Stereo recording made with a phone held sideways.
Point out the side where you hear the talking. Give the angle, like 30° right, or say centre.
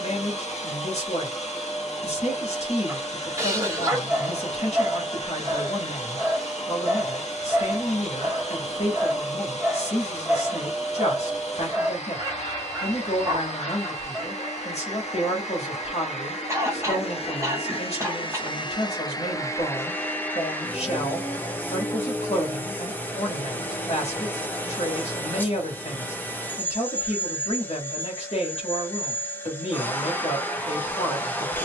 60° left.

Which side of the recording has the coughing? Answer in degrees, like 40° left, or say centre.
20° right.